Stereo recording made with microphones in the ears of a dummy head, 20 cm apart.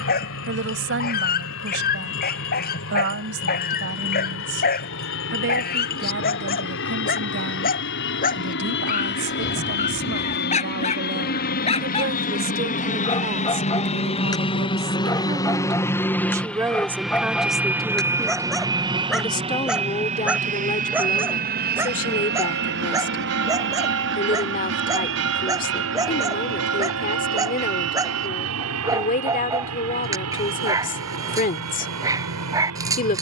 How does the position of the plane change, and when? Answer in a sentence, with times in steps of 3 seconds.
In this clip you hear the plane on the left from 0 s, in the centre from 15 s and on the right from 18 s.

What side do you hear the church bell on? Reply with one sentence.
In this clip you hear the church bell on the right.